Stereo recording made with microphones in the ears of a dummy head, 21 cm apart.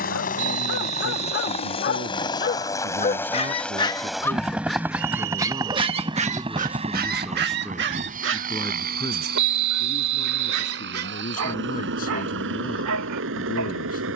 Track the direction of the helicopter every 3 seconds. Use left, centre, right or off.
left, centre, right, right, right.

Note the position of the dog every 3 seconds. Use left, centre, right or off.
left, centre, right, right, right.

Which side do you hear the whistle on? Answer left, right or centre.
right.